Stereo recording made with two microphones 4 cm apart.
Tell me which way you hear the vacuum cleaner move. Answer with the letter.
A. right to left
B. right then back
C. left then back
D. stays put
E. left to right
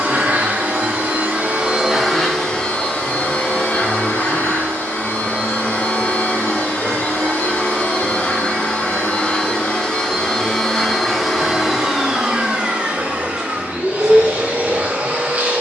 C.